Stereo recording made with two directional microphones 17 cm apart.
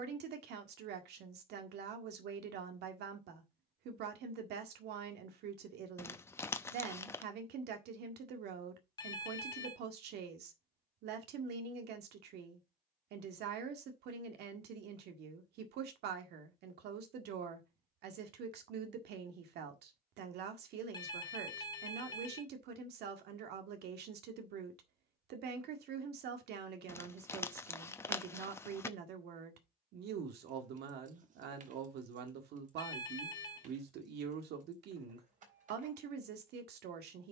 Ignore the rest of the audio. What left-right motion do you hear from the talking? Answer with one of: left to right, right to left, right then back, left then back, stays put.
stays put.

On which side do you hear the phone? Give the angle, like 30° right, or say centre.
20° left.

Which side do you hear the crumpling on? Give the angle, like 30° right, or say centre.
20° left.